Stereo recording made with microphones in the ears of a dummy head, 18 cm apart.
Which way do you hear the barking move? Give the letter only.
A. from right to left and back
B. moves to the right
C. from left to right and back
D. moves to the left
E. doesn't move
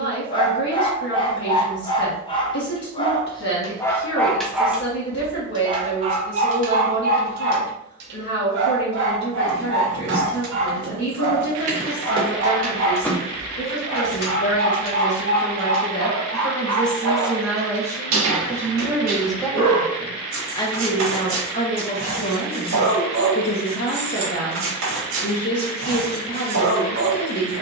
B.